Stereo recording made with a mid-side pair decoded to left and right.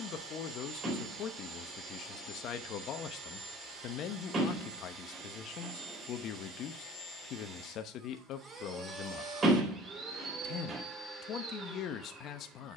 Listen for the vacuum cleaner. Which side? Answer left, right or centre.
right.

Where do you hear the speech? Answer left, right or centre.
left.